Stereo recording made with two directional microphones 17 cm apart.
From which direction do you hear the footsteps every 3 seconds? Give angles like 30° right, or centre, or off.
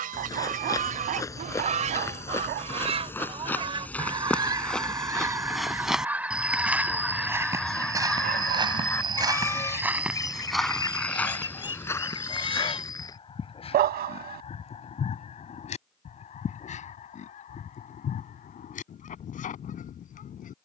20° left, 10° left, 20° right, centre, 20° left, off, off.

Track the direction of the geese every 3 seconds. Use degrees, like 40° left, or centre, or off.
50° right, 20° right, centre, 20° left, 30° left, 40° left, 50° left.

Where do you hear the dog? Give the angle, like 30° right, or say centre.
70° right.